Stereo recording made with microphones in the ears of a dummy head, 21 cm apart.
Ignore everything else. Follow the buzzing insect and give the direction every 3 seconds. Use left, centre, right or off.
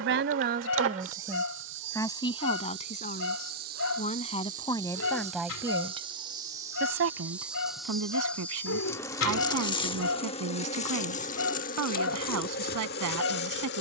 right, right, centre, left, left.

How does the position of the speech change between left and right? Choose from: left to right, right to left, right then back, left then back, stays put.
left then back.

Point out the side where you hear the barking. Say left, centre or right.
left.